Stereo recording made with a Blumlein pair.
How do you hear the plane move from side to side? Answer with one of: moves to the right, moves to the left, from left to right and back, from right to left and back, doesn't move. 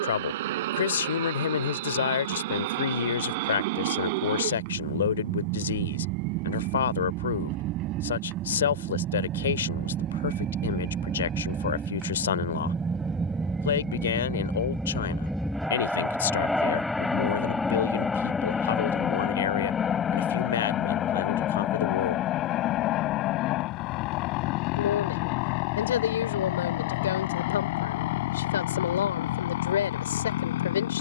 moves to the left.